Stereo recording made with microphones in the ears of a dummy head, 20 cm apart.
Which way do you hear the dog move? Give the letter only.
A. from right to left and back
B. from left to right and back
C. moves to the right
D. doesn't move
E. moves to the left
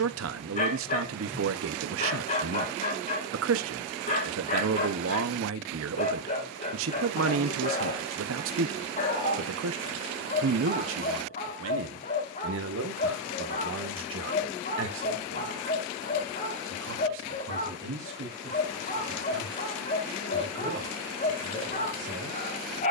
D.